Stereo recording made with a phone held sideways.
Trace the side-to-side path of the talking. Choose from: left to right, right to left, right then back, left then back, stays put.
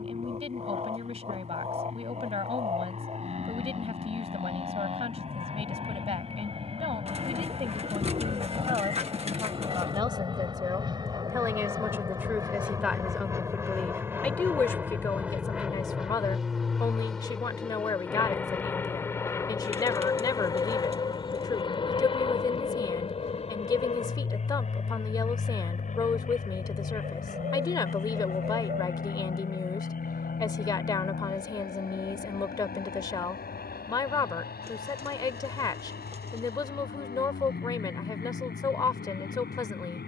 right to left.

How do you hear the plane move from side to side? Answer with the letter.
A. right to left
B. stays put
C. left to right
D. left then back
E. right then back
A.